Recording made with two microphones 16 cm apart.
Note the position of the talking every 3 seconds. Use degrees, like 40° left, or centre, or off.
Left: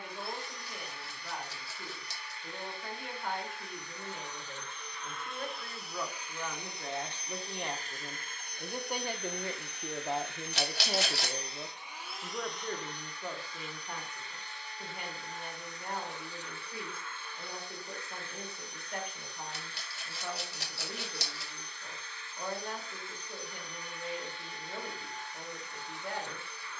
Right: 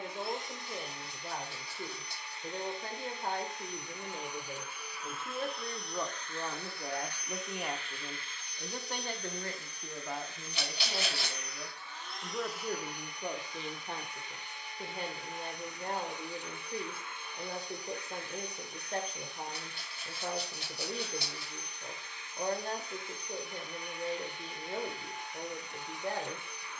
40° right, 30° right, 10° right, 30° left, 20° right, 40° right, 40° right, 40° right, 40° right.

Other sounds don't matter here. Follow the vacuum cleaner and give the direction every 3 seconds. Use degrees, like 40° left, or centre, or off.
20° right, 10° right, 30° left, 50° left, 10° right, 20° right, 20° right, 20° right, 20° right.